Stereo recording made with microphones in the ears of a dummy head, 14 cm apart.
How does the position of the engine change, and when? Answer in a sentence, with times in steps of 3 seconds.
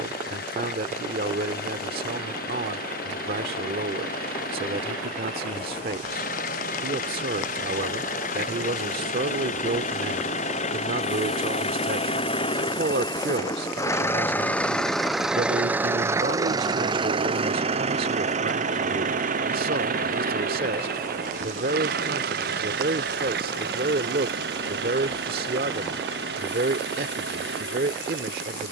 You can hear the engine on the left from 0 s and on the right from 15 s.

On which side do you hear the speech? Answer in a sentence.
In this clip you hear the speech on the right.